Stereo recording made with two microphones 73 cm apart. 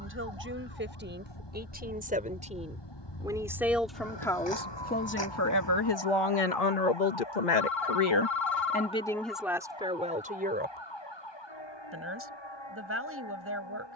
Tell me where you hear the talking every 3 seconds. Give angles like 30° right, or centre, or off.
10° right, 10° left, 50° left, 10° right, 20° right.